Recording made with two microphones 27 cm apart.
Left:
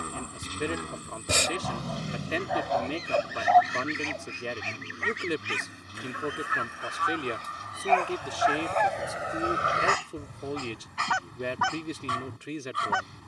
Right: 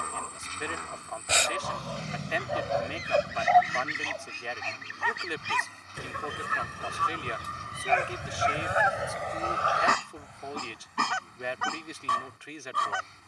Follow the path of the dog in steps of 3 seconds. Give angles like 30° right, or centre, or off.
50° right, 10° left, 10° right, 50° right, 60° right.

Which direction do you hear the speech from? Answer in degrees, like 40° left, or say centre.
40° left.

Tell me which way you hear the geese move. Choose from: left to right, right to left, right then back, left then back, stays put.
right then back.